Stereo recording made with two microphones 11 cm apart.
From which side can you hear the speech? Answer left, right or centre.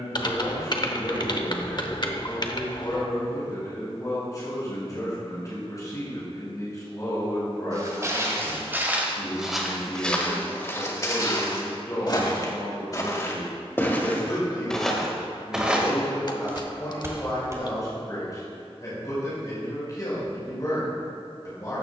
left.